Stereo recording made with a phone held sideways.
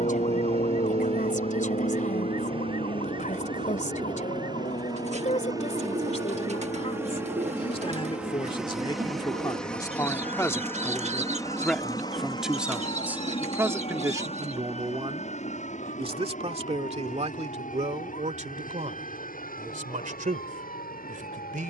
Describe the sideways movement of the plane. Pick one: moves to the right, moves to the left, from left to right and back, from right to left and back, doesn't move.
moves to the left.